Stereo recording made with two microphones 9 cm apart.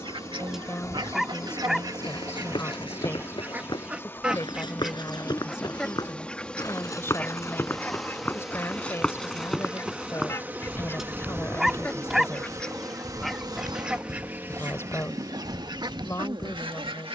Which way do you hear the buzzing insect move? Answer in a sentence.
In this clip you hear the buzzing insect go from the left side to the right.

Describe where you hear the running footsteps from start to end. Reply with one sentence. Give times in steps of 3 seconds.
You can hear the running footsteps on the left from 0 s, in the centre from 9 s and on the right from 12 s.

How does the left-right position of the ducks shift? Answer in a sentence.
You can hear the ducks go left and come back.